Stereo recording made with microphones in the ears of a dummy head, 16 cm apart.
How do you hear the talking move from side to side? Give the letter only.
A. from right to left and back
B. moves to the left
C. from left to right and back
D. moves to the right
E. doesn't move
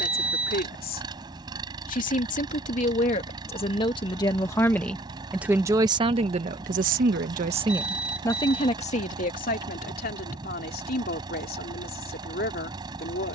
C.